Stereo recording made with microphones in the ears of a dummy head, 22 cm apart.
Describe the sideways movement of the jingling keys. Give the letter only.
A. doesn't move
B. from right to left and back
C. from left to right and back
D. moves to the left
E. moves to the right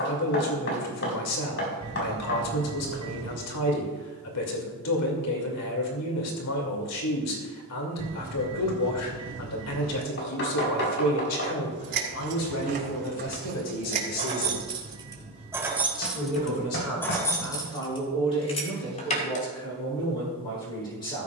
D.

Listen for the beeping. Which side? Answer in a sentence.
In this clip you hear the beeping on the right.